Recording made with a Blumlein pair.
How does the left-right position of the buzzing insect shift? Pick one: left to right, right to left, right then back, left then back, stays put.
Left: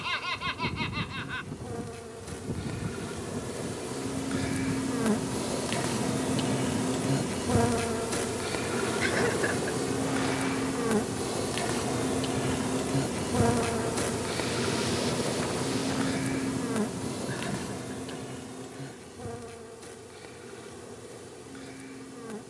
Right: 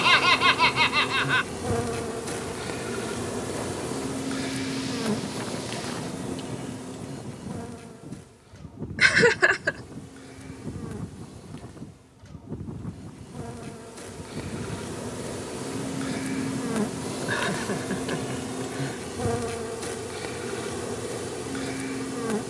left then back.